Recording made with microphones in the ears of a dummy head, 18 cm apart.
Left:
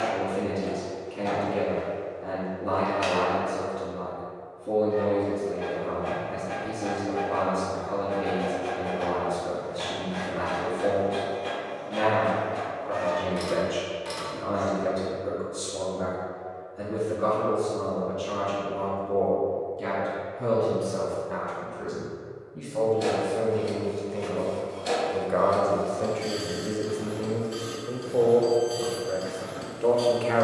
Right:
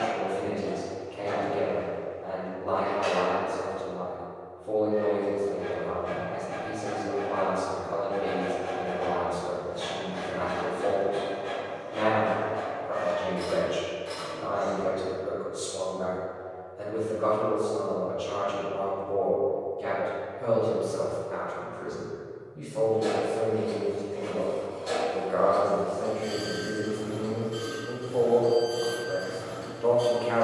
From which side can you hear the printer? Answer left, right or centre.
left.